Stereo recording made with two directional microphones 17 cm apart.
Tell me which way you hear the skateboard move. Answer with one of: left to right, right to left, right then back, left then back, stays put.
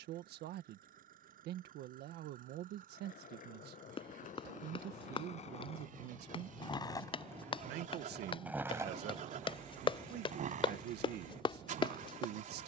left to right.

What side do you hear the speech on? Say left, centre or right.
right.